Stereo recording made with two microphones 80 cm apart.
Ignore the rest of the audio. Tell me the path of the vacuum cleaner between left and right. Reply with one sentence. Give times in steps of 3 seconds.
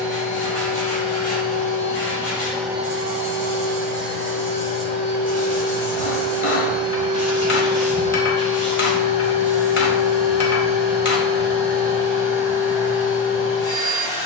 In this clip you hear the vacuum cleaner on the left from 0 s, on the right from 3 s, in the centre from 6 s and on the left from 9 s.